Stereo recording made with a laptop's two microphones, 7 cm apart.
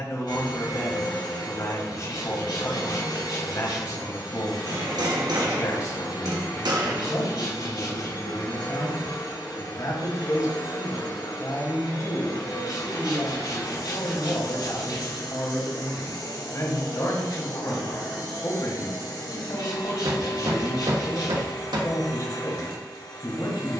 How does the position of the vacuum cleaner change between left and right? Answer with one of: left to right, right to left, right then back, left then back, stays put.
stays put.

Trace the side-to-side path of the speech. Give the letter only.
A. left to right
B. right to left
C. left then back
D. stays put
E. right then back
D.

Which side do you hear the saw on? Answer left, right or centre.
left.